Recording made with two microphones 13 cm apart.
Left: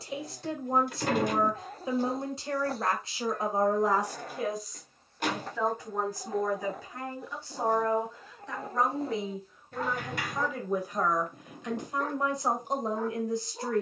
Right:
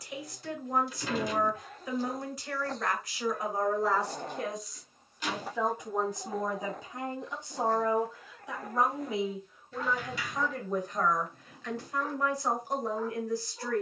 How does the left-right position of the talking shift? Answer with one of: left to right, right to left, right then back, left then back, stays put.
right then back.